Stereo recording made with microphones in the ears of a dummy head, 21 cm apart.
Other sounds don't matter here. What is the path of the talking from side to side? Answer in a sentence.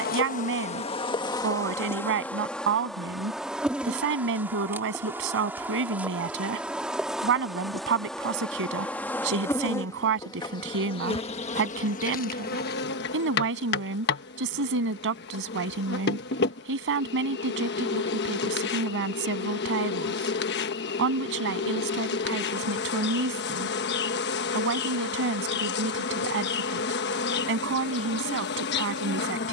You can hear the talking stay put.